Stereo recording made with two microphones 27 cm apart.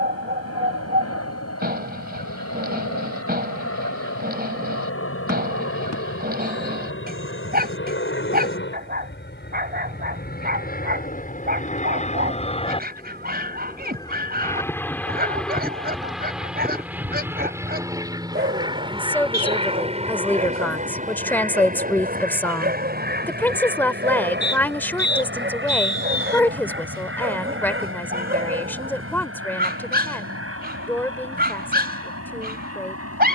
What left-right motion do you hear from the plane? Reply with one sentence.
You can hear the plane travel towards the right.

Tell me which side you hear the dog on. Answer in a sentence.
In this clip you hear the dog on the right.